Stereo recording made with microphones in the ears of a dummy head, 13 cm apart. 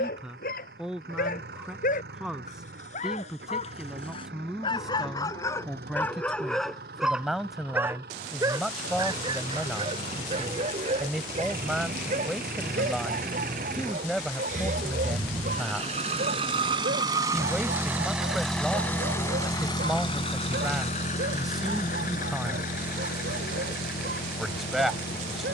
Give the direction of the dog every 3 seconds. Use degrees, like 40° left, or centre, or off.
60° left, 30° left, 10° right, 40° right, 60° right, 60° right, 70° right, 70° right, 70° right.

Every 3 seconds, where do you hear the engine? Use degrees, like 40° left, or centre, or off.
80° right, 80° right, 80° right, 70° right, 60° right, 40° right, 20° left, 60° left, 70° left.